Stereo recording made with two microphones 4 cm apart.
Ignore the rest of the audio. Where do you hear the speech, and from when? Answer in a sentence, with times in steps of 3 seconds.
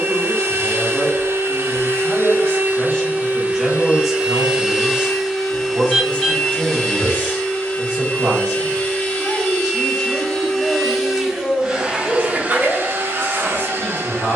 In this clip you hear the speech on the left from 0 s, in the centre from 3 s, on the right from 6 s, in the centre from 9 s and on the left from 12 s.